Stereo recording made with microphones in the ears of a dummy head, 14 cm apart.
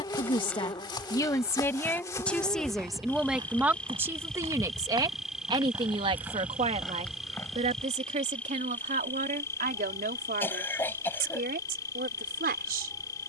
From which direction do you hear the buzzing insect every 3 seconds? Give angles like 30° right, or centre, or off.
20° left, centre, centre, 20° left, 20° left.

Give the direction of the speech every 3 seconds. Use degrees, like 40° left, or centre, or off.
20° left, 20° right, 40° right, 50° right, 60° right.